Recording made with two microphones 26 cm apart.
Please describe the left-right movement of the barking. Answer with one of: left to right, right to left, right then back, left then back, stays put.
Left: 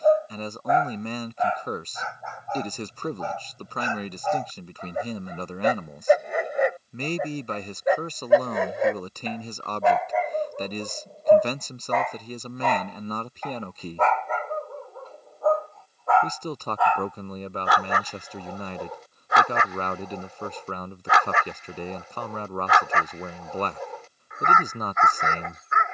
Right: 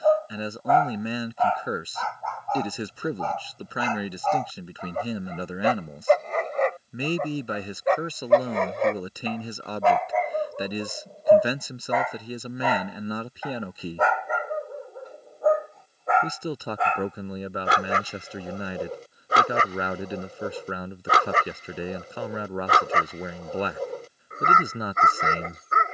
left to right.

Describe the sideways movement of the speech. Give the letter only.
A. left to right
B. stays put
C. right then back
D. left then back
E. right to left
B.